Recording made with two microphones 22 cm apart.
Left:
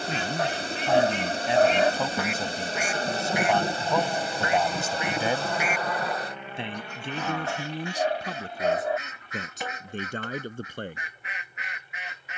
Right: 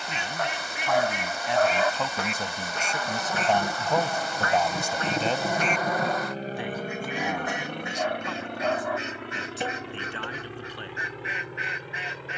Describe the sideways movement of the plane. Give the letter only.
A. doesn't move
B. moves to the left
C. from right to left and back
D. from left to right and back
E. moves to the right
E.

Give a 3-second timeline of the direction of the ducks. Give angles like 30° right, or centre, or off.
10° right, 10° left, 20° right, 30° right.